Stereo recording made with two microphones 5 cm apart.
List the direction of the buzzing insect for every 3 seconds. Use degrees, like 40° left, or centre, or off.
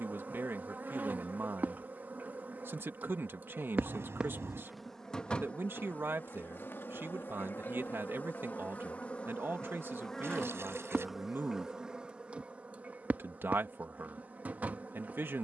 40° right, 10° right, 40° left, centre, 30° right.